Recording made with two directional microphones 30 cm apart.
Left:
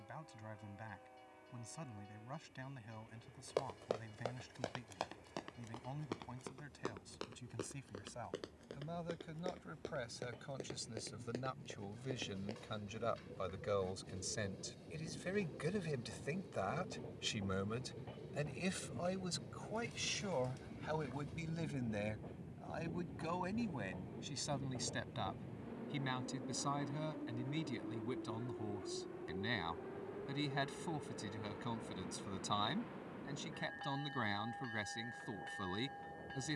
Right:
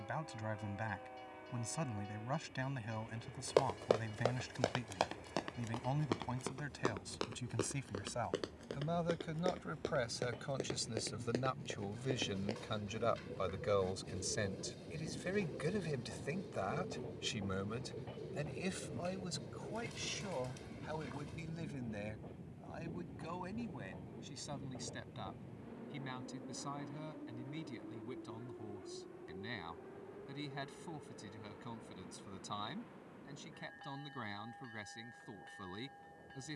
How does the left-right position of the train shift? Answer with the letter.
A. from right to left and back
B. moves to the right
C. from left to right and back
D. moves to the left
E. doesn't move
D.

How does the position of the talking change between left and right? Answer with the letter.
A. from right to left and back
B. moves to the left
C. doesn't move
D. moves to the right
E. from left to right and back
B.